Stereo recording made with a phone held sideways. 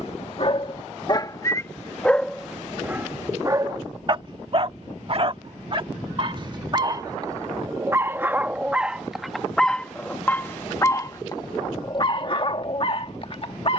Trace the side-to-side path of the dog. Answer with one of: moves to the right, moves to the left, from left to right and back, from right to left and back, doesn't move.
from left to right and back.